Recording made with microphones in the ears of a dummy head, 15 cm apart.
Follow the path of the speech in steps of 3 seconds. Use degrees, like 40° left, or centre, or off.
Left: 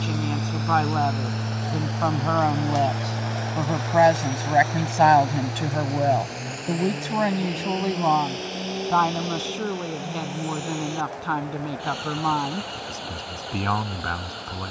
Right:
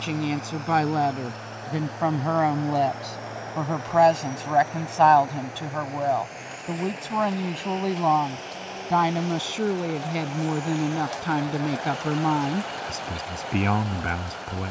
10° right, 10° left, 10° left, 20° right, 20° right.